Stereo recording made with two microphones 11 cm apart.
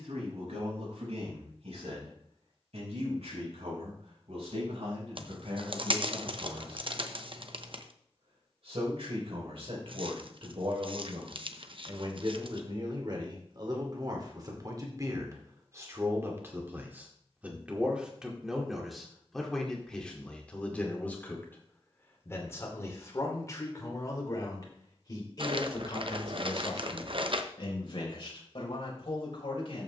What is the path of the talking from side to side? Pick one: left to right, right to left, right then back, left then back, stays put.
right to left.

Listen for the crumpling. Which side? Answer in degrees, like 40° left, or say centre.
50° right.